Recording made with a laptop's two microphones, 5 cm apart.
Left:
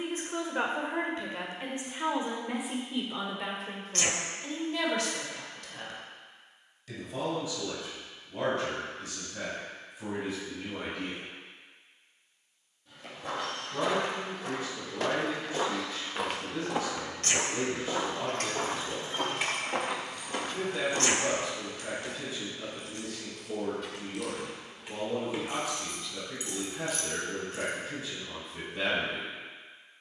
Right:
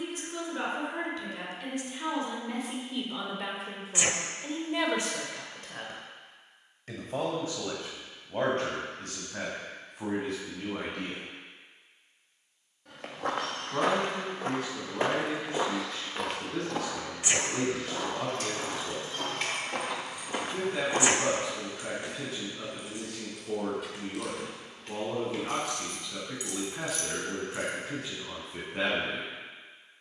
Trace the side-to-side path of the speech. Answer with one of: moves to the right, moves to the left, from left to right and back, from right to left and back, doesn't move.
moves to the right.